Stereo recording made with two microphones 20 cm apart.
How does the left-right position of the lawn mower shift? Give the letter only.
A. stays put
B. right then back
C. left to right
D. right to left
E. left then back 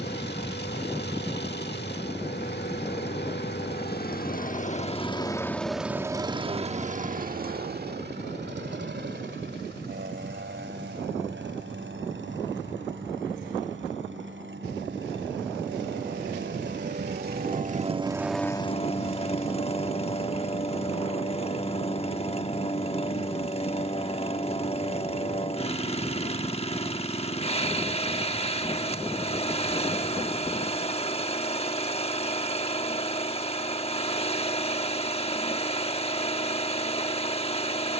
B.